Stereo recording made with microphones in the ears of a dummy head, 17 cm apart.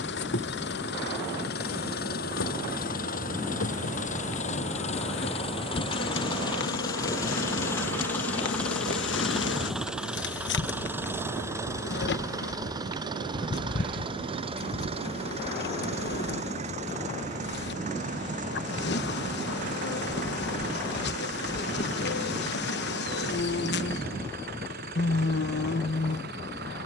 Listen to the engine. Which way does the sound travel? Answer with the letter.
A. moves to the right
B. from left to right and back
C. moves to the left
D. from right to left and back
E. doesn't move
A.